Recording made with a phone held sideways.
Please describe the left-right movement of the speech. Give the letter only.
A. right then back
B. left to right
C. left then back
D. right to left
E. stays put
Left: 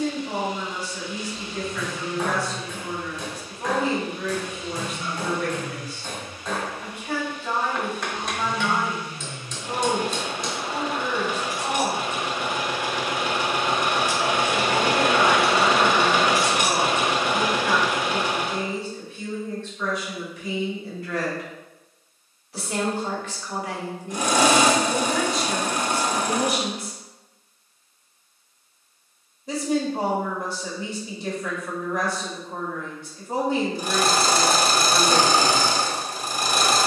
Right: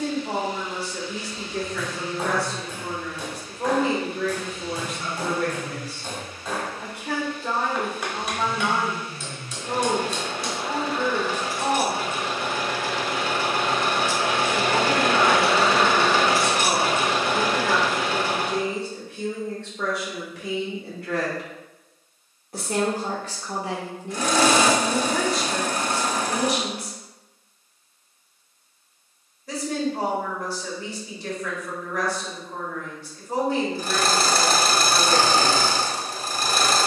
D.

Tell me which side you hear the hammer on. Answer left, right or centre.
centre.